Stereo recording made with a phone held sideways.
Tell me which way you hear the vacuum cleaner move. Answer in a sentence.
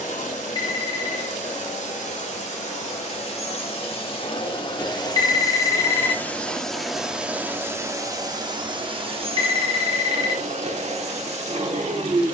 In this clip you hear the vacuum cleaner move from left to right.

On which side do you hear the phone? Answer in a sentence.
In this clip you hear the phone on the left.